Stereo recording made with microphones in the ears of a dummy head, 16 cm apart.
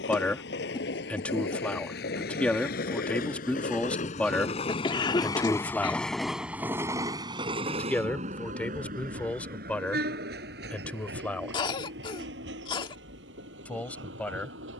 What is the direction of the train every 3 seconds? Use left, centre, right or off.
left, left, right, right, right.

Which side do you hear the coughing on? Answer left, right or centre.
left.